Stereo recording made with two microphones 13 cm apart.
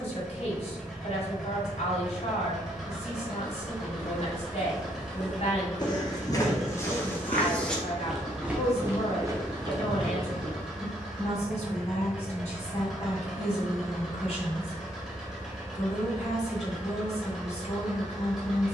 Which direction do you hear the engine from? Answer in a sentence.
You can hear the engine in the centre.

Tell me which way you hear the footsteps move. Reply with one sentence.
You can hear the footsteps go left and come back.